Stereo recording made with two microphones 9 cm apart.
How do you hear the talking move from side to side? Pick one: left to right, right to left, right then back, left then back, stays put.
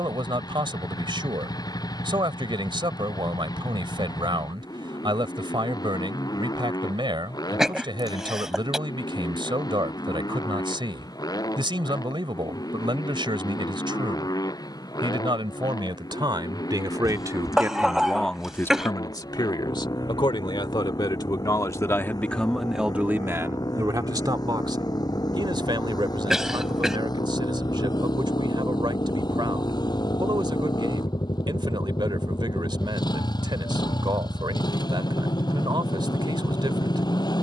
left then back.